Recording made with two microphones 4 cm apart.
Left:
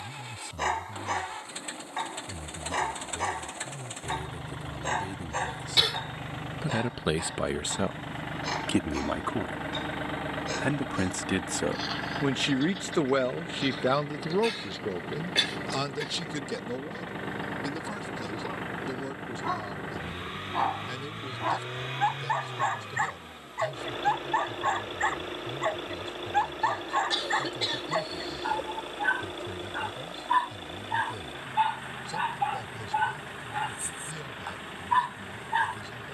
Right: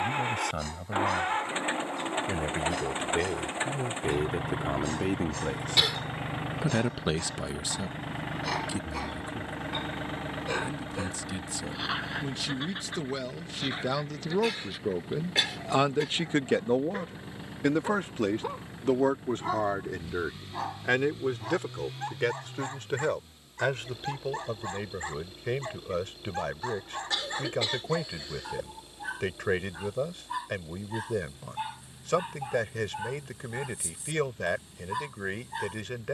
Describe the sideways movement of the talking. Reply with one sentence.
You can hear the talking move from right to left and back again.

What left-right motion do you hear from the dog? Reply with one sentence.
You can hear the dog move from left to right and back again.